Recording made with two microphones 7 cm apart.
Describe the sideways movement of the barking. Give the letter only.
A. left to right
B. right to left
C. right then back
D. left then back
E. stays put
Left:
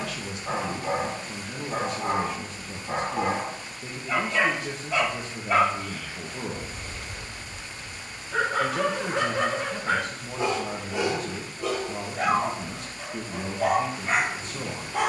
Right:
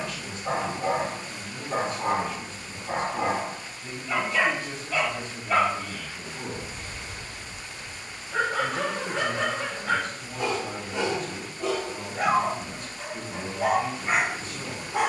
D.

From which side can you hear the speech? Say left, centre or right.
left.